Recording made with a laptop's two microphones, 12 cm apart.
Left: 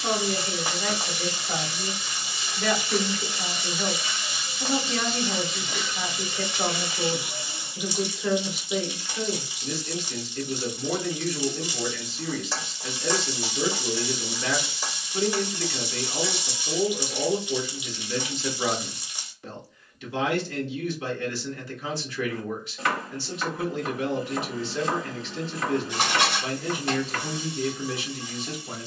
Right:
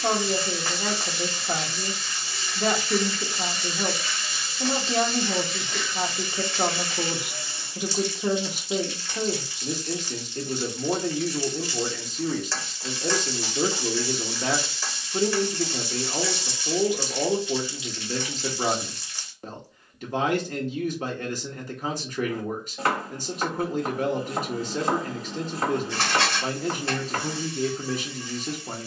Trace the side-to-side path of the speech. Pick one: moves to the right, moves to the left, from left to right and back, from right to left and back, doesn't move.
doesn't move.